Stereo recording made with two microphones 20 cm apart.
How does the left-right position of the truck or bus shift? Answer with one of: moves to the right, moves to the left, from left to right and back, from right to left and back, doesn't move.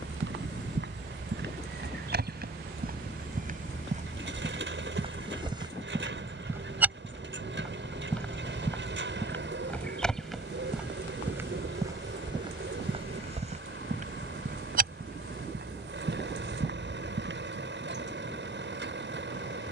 doesn't move.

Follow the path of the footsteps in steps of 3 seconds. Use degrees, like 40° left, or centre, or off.
50° right, 30° right, centre, centre, 30° right, 50° right, off.